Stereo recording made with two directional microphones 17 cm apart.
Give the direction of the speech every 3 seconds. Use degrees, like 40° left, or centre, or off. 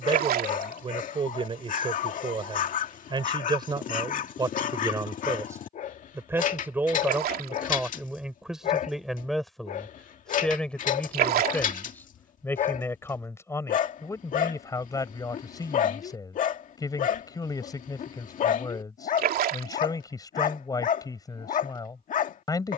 30° right, 20° right, 10° right, 10° left, 20° left, 20° left, 20° left, 20° left.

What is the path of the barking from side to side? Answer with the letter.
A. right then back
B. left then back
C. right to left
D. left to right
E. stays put
E.